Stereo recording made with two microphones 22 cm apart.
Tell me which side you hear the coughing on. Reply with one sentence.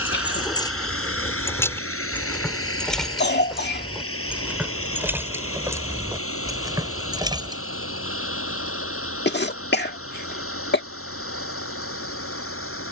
In this clip you hear the coughing on the left.